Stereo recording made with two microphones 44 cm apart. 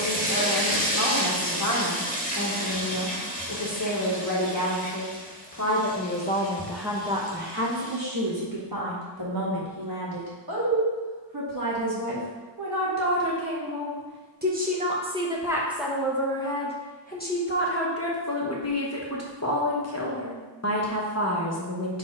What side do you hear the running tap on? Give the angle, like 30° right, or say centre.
20° left.